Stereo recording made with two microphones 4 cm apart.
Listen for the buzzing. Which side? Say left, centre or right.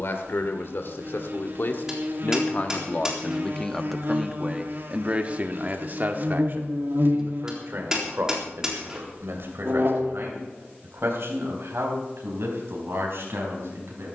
right.